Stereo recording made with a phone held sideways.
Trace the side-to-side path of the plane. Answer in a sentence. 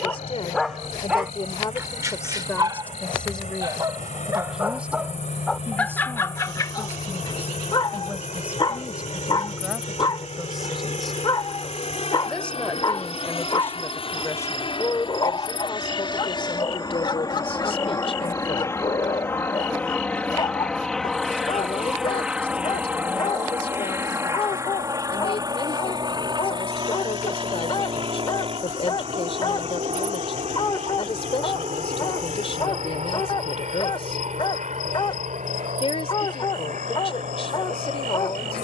You can hear the plane move from left to right.